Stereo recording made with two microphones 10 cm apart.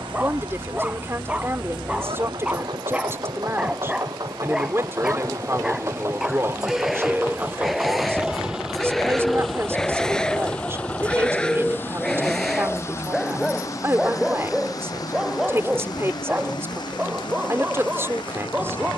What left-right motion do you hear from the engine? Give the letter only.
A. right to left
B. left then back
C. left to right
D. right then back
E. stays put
A.